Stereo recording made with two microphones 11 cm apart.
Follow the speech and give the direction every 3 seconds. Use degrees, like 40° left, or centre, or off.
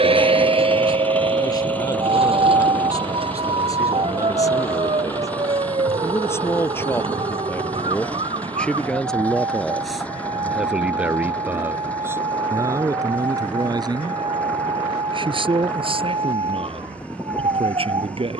40° left, 30° left, 20° left, 10° right, 30° right, 60° right.